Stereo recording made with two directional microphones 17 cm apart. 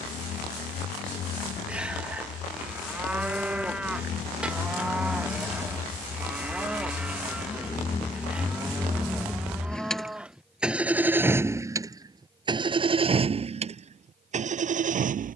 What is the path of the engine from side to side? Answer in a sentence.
In this clip you hear the engine go from the left side to the right.